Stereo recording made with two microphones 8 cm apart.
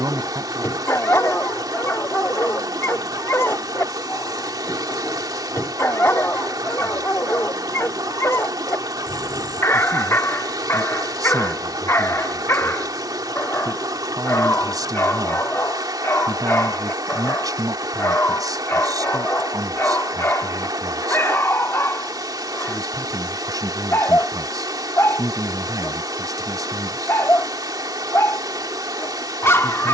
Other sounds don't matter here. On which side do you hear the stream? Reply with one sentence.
You can hear the stream on the right.